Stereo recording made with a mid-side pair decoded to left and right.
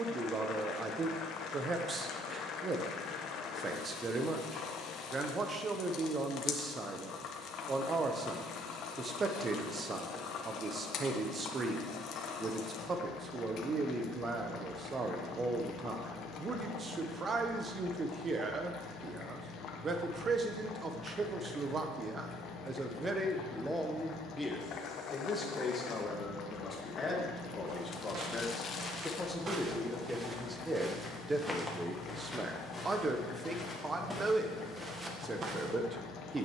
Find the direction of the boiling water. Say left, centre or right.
left.